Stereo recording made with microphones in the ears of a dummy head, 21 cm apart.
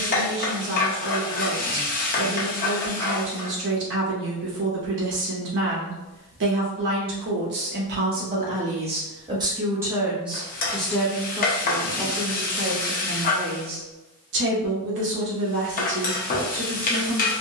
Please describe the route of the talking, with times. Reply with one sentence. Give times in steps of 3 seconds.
You can hear the talking on the right from 0 s, in the centre from 9 s and on the right from 12 s.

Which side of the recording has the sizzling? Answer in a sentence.
In this clip you hear the sizzling on the left.